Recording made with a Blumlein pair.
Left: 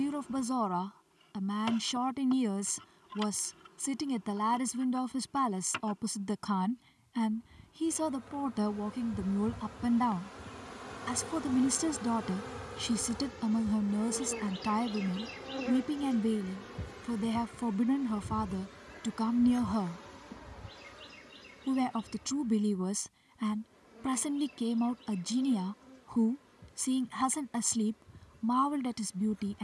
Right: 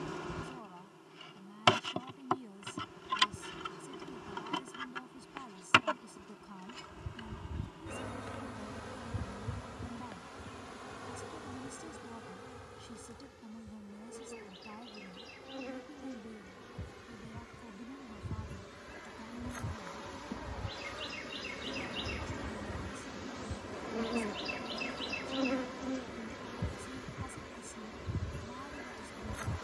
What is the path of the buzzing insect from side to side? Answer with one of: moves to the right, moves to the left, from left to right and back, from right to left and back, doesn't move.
from right to left and back.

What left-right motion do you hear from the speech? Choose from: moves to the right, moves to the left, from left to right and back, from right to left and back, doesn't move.
doesn't move.